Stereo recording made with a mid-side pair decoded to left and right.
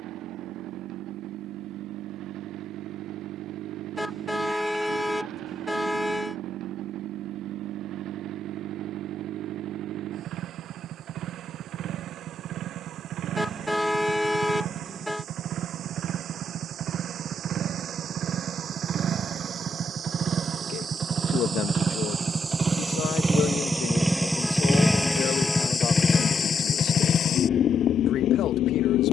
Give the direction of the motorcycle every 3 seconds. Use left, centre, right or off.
right, right, right, right, right, right, right, right, centre, left.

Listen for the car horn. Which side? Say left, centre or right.
centre.